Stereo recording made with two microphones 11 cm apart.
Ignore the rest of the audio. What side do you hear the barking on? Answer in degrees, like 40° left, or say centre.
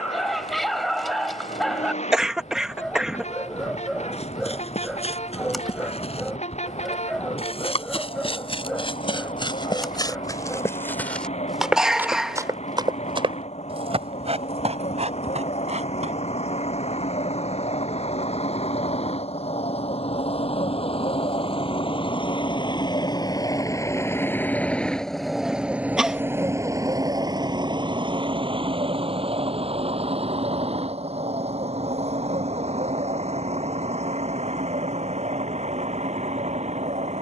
centre.